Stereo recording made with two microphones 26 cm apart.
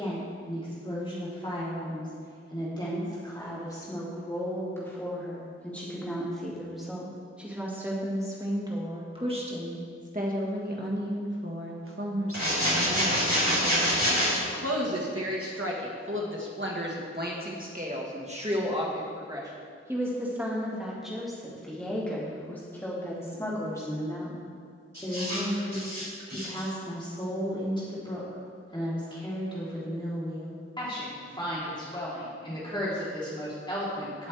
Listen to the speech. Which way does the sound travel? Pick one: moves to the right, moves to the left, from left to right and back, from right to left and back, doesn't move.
from left to right and back.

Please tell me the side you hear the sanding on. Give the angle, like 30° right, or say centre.
80° right.